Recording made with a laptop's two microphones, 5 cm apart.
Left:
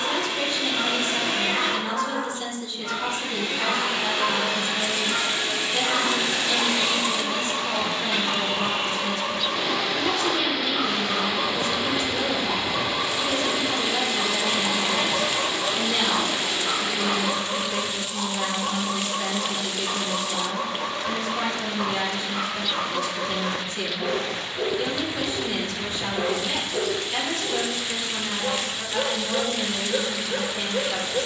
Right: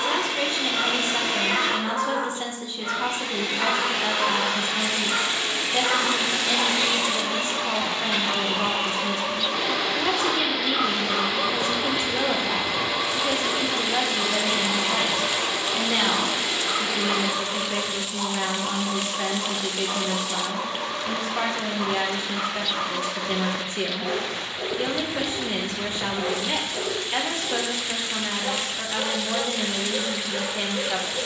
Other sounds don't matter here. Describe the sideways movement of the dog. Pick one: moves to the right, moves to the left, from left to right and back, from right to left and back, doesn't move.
moves to the left.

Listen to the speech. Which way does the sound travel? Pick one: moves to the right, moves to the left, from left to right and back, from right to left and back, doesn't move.
doesn't move.